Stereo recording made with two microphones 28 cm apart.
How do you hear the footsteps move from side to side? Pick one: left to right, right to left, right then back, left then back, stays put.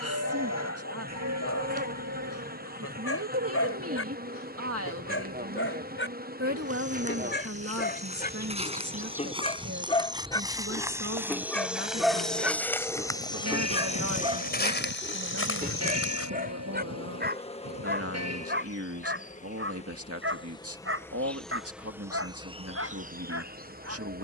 right to left.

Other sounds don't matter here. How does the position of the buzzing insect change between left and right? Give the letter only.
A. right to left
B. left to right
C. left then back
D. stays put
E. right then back
C.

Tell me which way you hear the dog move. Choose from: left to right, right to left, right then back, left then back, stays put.
left to right.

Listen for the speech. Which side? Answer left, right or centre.
right.